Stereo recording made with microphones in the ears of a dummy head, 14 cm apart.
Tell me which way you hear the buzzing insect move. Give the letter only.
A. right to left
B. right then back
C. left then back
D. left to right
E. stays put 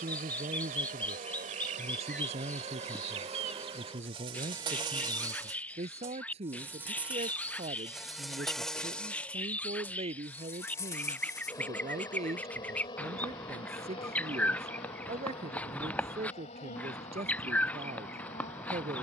A.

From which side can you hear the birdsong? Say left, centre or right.
centre.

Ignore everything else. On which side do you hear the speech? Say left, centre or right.
right.